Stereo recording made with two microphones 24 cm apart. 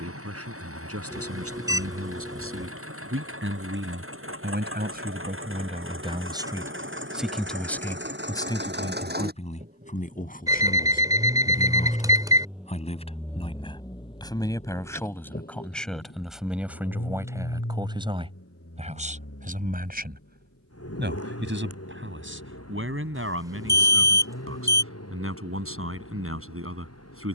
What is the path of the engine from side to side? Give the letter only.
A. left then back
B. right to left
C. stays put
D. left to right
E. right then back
B.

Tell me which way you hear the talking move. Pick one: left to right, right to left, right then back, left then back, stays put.
left then back.